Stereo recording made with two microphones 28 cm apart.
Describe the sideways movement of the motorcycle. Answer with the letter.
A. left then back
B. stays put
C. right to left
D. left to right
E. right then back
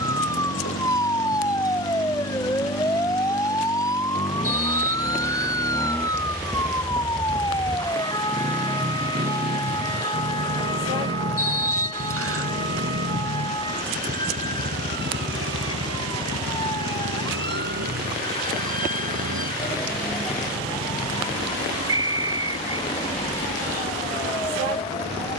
D.